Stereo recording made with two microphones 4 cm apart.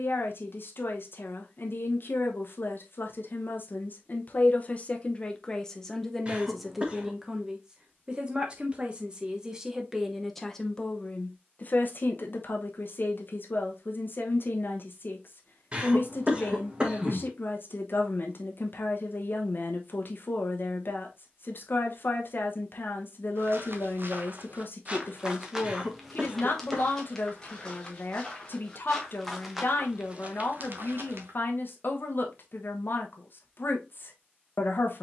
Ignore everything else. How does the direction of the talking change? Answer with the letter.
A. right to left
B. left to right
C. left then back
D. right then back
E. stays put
D.